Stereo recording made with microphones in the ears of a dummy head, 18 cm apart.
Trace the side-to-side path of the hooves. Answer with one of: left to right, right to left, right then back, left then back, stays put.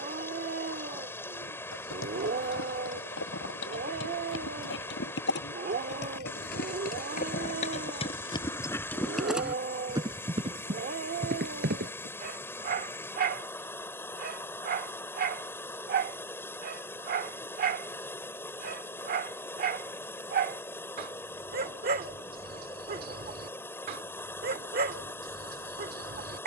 left to right.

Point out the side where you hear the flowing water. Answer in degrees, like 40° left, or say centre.
10° left.